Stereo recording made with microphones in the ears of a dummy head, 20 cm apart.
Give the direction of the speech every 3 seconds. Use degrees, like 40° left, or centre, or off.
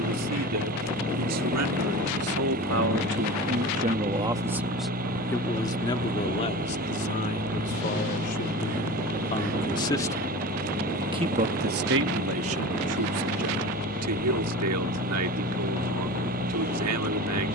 80° right, 10° right, 30° left, 10° right, 80° right, 80° right.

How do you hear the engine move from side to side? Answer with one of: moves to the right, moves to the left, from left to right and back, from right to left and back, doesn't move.
doesn't move.